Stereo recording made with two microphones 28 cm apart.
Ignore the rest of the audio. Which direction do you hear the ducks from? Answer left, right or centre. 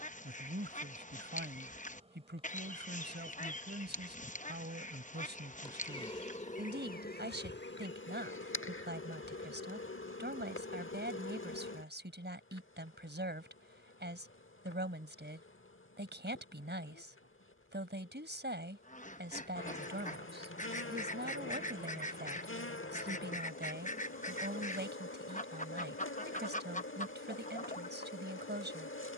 left.